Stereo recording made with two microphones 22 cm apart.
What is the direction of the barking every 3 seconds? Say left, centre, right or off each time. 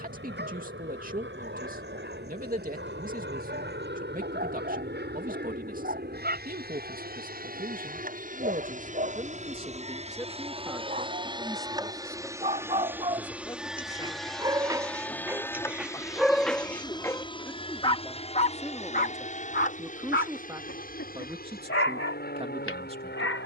right, right, right, right, right, centre, left, left.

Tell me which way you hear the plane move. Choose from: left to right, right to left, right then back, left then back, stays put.
right to left.